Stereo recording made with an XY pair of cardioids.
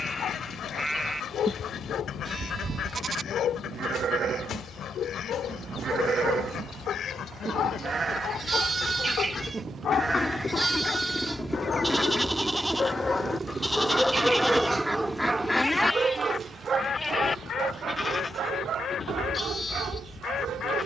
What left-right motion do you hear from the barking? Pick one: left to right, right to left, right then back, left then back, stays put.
left to right.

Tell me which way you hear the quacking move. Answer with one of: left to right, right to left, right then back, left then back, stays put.
right then back.